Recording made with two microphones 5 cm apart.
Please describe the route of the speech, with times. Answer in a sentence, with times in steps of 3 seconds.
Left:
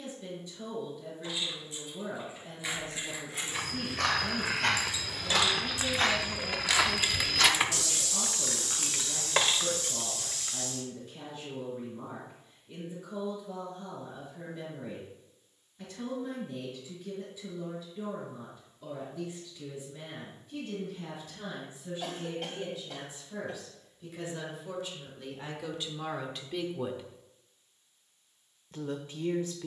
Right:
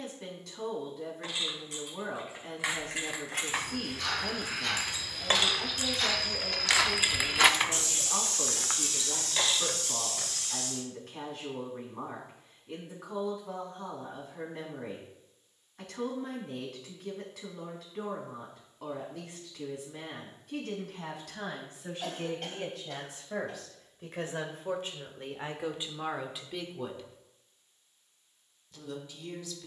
You can hear the speech on the right from 0 s and on the left from 27 s.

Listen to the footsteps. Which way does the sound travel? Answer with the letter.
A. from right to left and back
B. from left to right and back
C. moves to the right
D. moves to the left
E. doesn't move
C.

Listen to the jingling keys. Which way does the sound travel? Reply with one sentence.
In this clip you hear the jingling keys move to the left.